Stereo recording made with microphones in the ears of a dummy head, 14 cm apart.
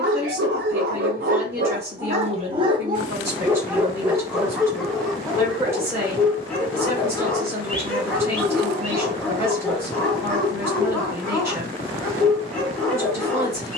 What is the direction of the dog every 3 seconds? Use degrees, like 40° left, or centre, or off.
50° right, 10° right, 10° left, 10° left, 10° left.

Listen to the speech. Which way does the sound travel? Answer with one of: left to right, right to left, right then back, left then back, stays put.
stays put.